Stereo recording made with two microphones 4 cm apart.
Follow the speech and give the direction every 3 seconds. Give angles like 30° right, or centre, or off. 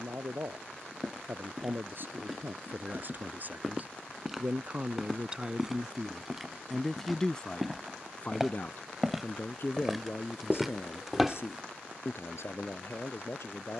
50° right, 30° right, 20° left, 60° left, 70° left.